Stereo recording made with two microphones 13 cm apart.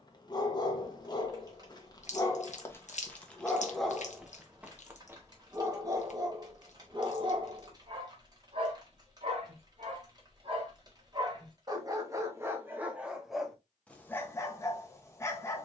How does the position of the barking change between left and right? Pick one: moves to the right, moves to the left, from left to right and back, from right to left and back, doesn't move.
from left to right and back.